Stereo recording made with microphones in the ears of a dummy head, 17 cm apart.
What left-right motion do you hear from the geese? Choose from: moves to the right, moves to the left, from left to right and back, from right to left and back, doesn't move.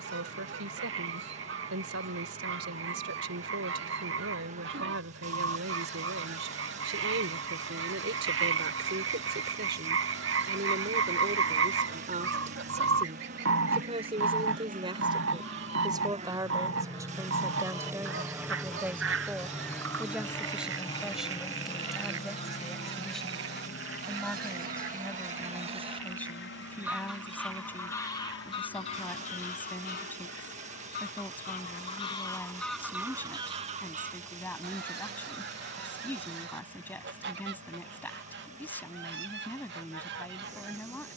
from right to left and back.